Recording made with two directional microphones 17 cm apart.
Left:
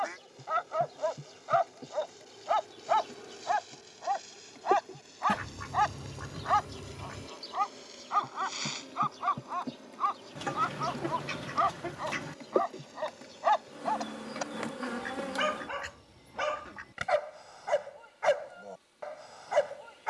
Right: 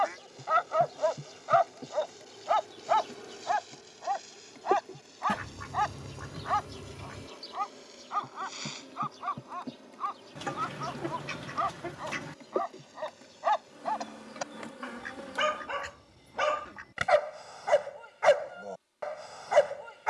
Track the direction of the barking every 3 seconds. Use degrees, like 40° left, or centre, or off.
20° right, centre, 20° left, 20° left, 10° left, 20° right, 30° right.